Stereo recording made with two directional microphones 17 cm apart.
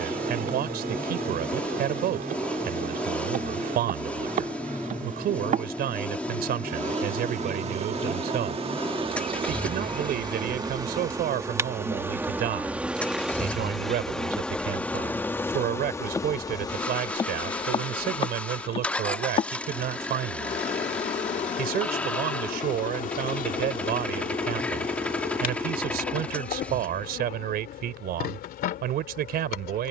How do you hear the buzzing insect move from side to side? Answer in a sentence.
You can hear the buzzing insect go from the right side to the left.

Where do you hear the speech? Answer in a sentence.
You can hear the speech on the right.